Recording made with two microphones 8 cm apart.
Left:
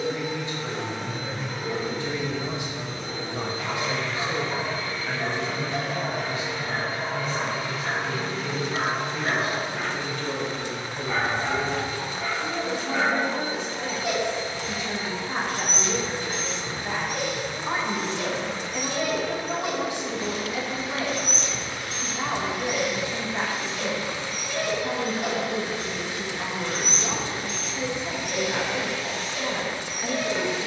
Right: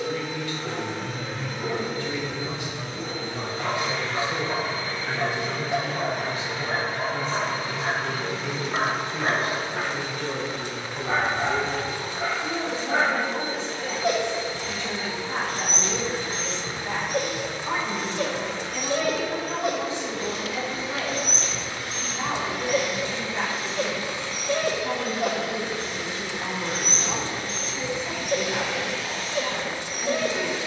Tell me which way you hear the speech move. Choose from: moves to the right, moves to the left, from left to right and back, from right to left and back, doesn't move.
from left to right and back.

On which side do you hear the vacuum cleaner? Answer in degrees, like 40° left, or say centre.
centre.